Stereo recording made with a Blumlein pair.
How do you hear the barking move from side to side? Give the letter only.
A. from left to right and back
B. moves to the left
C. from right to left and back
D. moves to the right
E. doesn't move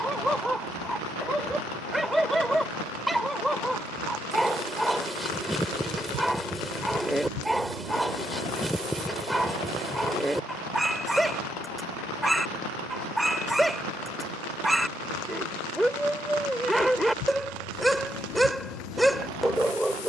E.